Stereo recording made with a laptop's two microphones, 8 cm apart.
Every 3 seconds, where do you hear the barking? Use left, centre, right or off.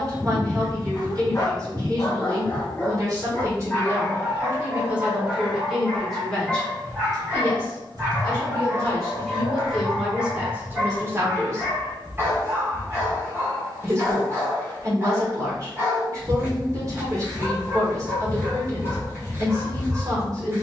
left, centre, right, right, right, right, right.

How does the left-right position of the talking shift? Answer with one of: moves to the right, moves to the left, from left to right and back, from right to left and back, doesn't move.
from right to left and back.